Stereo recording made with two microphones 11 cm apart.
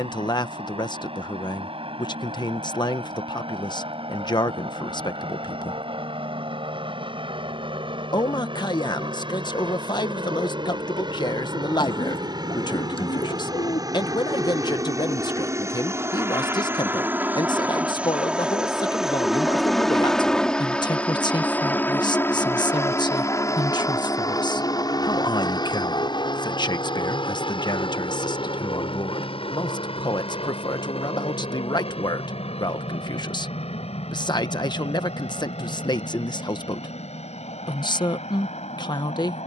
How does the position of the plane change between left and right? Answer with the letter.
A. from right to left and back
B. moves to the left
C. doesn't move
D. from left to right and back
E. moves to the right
B.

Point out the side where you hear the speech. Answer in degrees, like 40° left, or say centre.
40° left.